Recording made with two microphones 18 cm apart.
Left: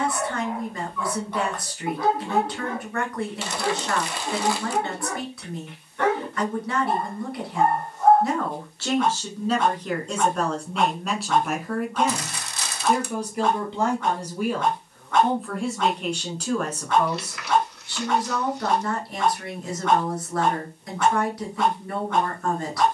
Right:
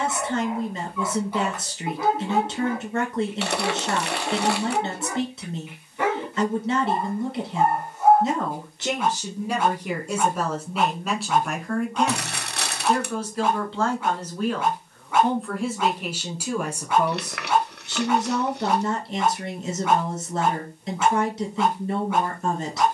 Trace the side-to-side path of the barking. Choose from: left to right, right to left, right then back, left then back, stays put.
stays put.